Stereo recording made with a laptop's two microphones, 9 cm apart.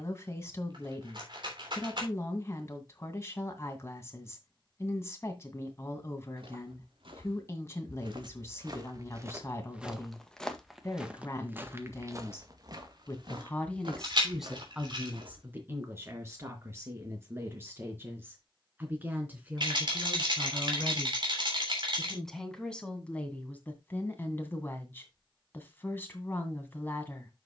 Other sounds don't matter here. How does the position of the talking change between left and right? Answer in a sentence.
In this clip you hear the talking go right and come back.